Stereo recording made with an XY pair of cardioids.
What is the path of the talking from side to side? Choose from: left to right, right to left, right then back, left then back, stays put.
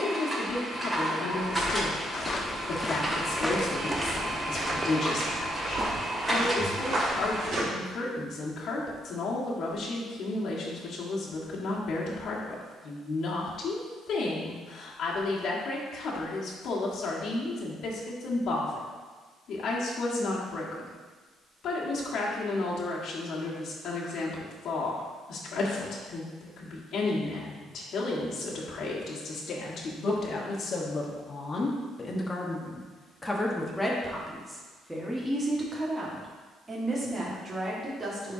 left to right.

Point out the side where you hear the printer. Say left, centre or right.
centre.